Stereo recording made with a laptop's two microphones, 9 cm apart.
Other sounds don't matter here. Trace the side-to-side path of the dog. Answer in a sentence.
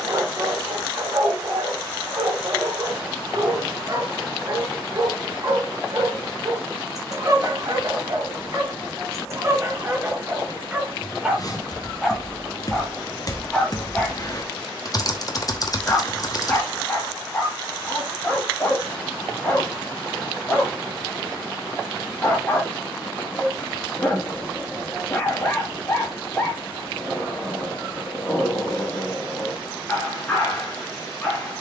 In this clip you hear the dog travel towards the left.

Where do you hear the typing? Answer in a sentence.
You can hear the typing on the left.